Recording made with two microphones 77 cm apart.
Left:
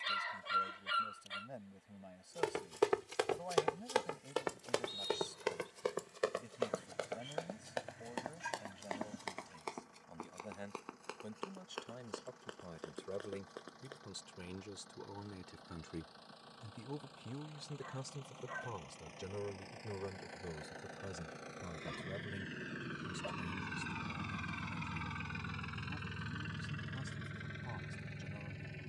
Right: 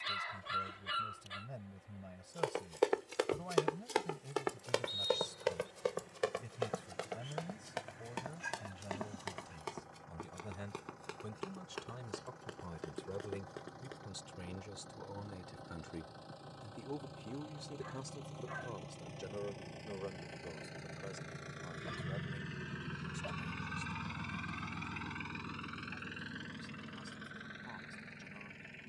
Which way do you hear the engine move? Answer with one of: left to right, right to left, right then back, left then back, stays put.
right to left.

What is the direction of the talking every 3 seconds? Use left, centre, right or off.
right, right, right, right, right, centre, left, left, left, left.